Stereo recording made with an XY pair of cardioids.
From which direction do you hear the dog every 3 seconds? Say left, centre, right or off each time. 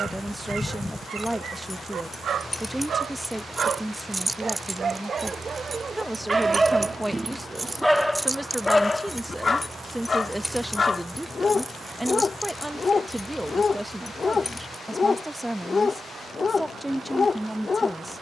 right, right, centre, left, left, left.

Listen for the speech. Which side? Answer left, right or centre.
centre.